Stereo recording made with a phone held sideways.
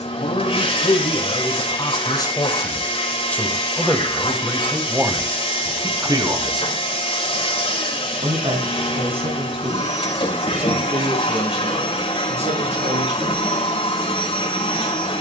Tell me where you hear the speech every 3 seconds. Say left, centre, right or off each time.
left, centre, right, right, right.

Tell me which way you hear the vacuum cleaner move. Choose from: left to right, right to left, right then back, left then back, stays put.
stays put.